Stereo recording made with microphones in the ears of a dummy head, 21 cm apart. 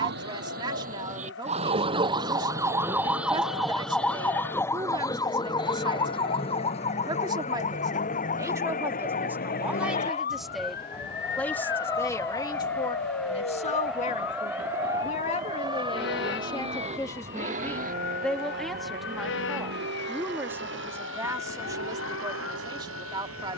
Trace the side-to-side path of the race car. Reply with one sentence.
In this clip you hear the race car travel towards the right.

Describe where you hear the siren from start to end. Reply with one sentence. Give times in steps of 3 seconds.
You can hear the siren on the right from 0 s, in the centre from 3 s and on the left from 6 s.